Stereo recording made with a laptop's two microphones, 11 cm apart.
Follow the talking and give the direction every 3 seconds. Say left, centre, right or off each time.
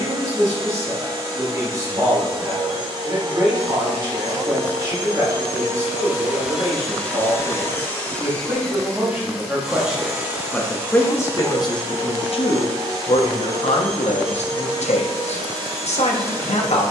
right, right, right, centre, left, left.